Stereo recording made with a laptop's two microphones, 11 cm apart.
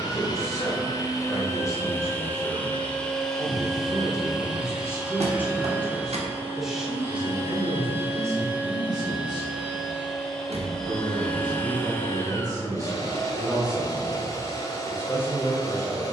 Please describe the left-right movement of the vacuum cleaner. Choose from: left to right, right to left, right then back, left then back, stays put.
right then back.